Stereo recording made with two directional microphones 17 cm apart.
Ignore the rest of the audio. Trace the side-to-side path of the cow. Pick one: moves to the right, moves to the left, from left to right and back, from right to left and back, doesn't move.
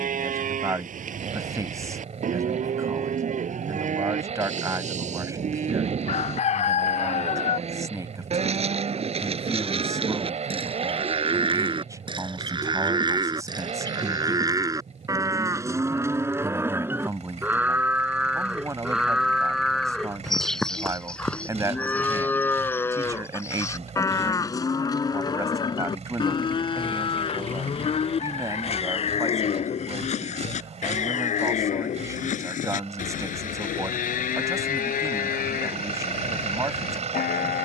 moves to the left.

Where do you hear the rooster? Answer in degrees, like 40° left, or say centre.
40° left.